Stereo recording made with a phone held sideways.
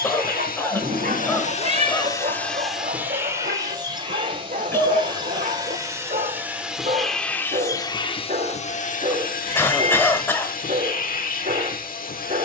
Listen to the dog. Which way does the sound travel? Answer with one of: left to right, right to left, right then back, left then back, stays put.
stays put.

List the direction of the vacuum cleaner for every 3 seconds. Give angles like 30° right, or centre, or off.
40° left, 20° right, 20° left, 60° left.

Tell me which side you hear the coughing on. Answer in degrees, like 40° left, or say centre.
10° left.